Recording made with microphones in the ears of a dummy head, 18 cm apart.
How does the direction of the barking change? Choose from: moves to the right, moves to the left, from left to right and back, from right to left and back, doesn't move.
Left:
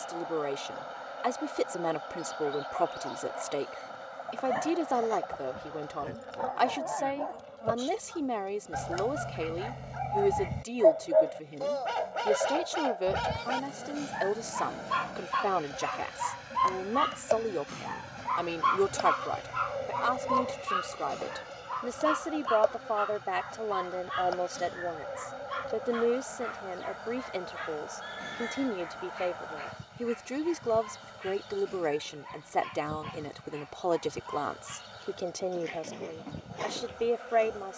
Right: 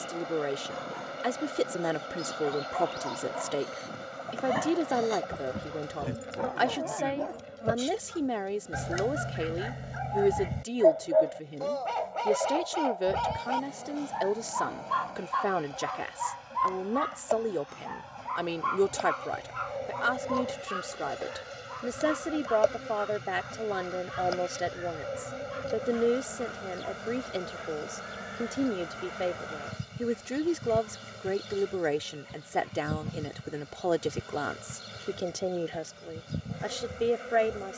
moves to the left.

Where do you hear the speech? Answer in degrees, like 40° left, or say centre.
10° right.